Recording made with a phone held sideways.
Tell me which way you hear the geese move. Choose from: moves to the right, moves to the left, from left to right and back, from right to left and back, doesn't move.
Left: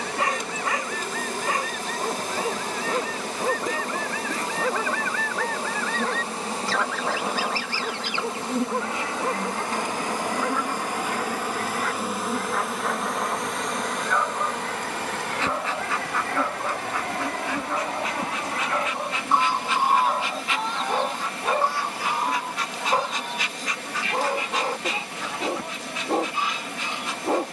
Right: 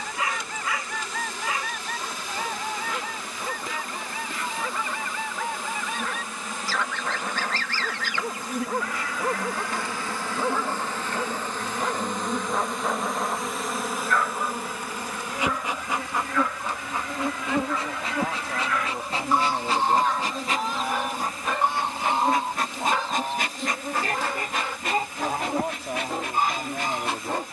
from right to left and back.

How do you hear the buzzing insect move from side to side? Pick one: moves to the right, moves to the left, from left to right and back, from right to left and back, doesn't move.
moves to the right.